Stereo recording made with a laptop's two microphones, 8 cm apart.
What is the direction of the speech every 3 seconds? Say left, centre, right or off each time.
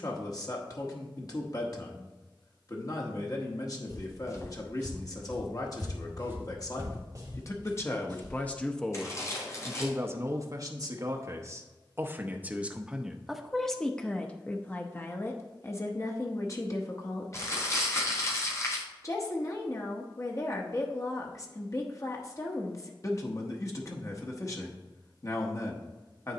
left, left, left, right, centre, left, left, left, left.